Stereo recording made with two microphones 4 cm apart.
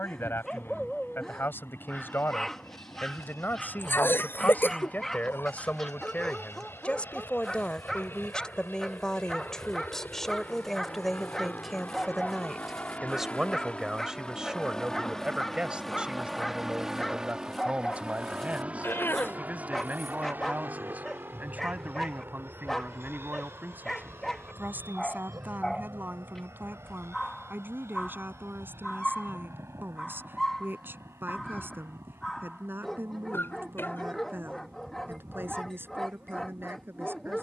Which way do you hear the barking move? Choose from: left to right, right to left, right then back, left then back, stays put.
stays put.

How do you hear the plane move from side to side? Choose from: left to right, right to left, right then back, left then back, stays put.
left to right.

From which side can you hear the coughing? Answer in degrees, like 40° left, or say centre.
50° left.